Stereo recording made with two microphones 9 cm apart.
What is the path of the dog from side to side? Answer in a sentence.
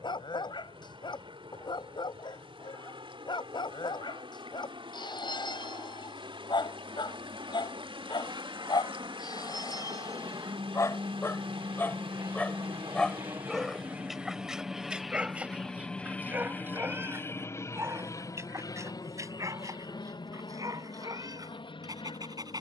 You can hear the dog go from the left side to the right.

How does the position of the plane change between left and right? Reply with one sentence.
You can hear the plane travel towards the left.